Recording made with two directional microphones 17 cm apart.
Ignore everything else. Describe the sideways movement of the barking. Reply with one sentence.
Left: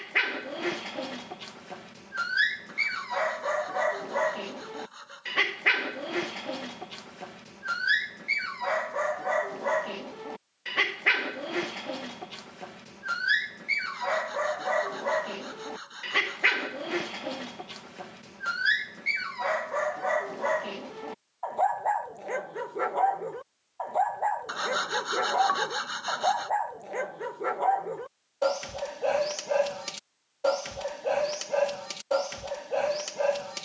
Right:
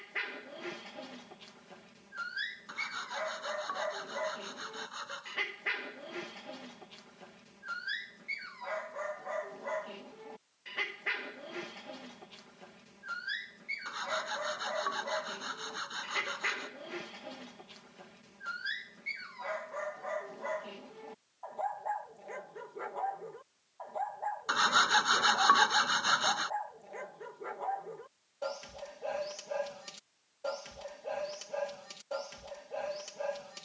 In this clip you hear the barking stay in one place.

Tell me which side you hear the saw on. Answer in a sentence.
In this clip you hear the saw on the right.